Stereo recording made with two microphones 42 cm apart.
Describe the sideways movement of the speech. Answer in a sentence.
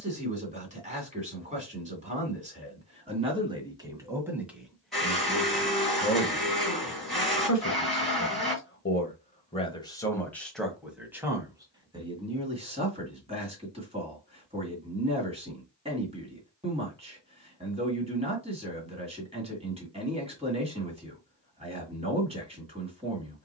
In this clip you hear the speech go left and come back.